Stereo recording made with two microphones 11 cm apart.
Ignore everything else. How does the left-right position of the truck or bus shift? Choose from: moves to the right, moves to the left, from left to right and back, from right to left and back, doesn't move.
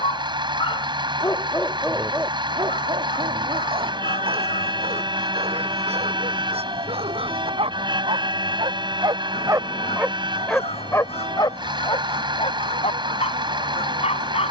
doesn't move.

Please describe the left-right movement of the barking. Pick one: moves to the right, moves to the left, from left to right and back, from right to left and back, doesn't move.
from left to right and back.